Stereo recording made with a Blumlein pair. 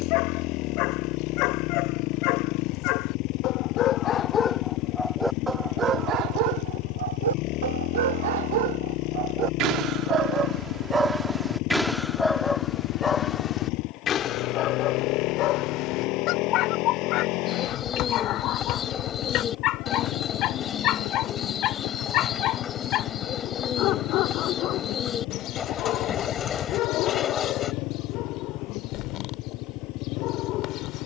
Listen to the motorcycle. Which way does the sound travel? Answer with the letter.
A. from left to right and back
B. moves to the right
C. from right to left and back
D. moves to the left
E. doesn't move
E.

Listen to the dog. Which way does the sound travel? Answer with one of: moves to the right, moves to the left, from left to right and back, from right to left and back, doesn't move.
from left to right and back.